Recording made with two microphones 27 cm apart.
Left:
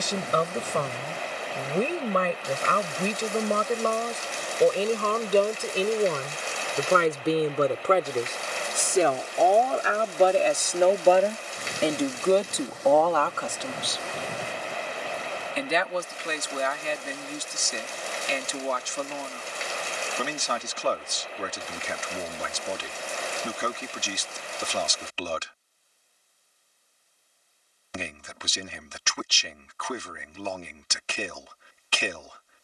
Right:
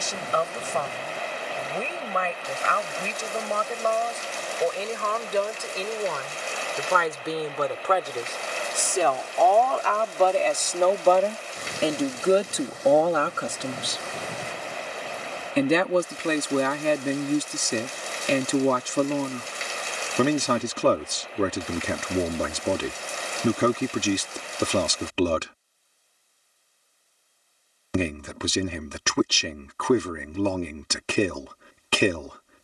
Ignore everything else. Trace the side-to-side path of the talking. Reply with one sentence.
In this clip you hear the talking move to the right.